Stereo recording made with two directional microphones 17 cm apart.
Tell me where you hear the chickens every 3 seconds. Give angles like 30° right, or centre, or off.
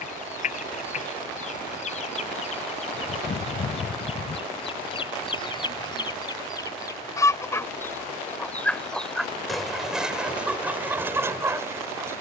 50° left, 30° left, 20° left, 10° right.